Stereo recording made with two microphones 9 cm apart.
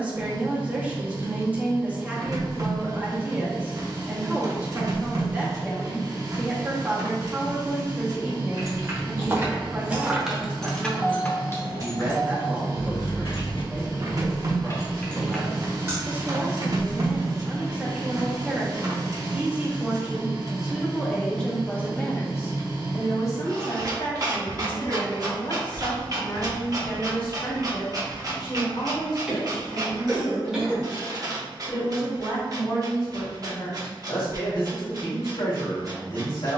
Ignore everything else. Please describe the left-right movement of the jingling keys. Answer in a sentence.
You can hear the jingling keys go left and come back.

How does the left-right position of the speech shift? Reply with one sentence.
In this clip you hear the speech go from the right side to the left.